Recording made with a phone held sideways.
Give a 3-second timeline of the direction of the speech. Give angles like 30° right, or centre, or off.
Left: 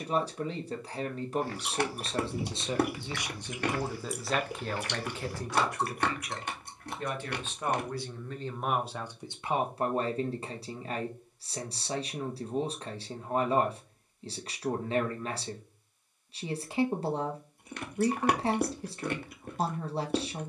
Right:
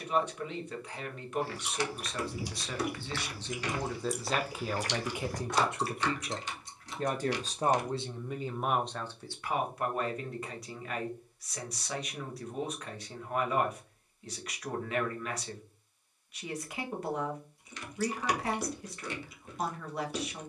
30° left, centre, 20° right, 30° left, 30° left, 30° left, 30° left.